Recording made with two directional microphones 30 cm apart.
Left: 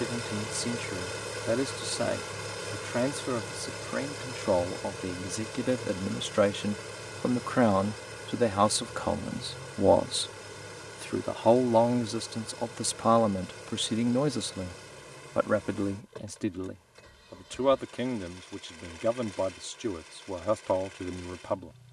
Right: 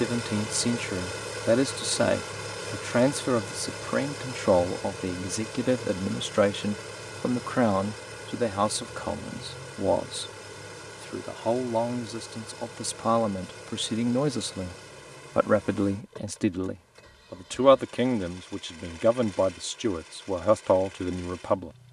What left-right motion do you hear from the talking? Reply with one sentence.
In this clip you hear the talking go left and come back.